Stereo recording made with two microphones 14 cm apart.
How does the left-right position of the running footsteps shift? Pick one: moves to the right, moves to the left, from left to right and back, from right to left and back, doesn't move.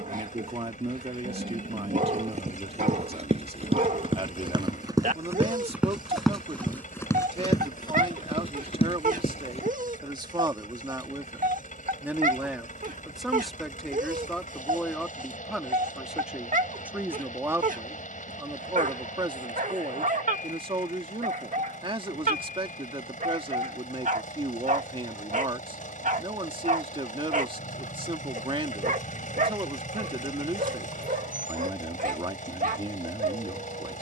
moves to the left.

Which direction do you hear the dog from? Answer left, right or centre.
right.